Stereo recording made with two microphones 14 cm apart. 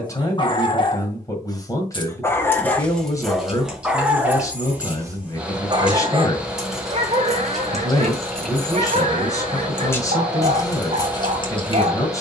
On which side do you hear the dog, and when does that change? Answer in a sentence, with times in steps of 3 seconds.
In this clip you hear the dog on the left from 0 s, in the centre from 3 s and on the right from 6 s.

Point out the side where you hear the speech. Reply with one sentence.
In this clip you hear the speech on the left.